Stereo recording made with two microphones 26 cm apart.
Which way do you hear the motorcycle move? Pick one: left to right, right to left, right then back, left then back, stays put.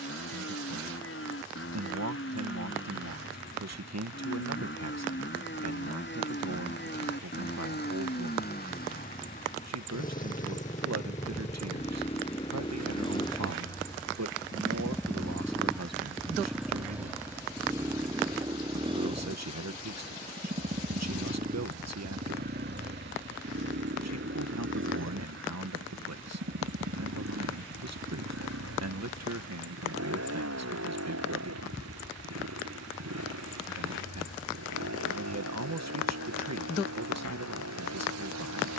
left to right.